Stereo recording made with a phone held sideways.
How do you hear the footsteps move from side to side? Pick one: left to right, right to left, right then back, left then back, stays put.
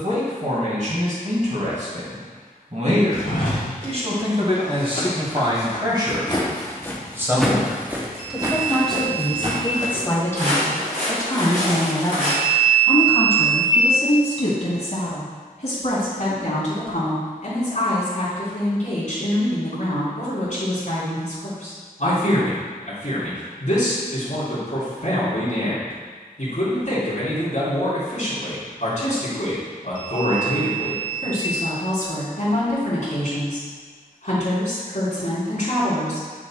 left to right.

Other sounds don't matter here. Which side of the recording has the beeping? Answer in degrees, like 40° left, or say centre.
10° right.